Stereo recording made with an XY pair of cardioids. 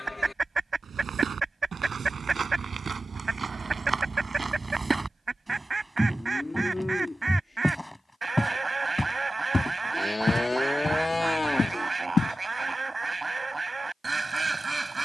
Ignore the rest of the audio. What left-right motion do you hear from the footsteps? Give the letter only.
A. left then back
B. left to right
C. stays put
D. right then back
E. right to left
E.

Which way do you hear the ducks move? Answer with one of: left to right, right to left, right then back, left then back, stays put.
stays put.